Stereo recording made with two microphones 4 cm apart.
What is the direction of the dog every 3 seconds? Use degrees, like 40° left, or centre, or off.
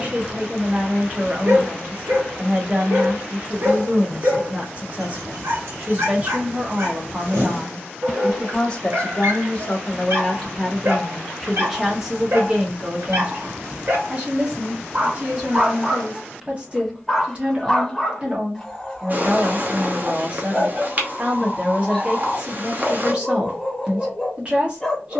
70° right, 70° right, 70° right, 70° right, 60° right, 10° right, 10° left, 10° left, 10° left.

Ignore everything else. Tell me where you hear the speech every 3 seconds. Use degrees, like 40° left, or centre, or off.
30° right, 30° right, 10° right, 10° left, 20° right, 30° right, 30° right, 30° right, 30° right.